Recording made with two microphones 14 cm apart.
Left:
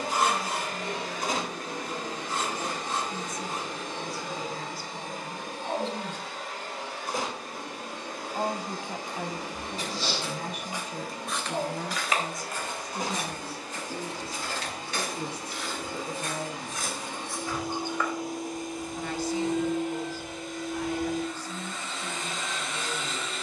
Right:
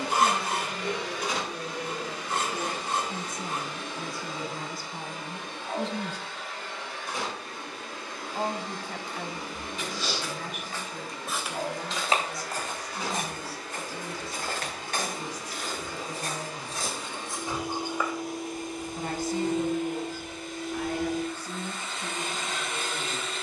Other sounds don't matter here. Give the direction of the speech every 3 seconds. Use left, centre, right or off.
right, right, centre, left, left, left, right, right.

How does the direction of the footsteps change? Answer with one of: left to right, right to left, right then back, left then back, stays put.
right then back.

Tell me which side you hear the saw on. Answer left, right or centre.
right.